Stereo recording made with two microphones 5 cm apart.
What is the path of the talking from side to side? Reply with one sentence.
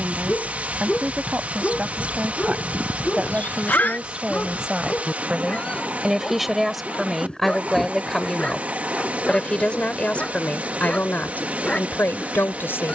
You can hear the talking travel towards the left.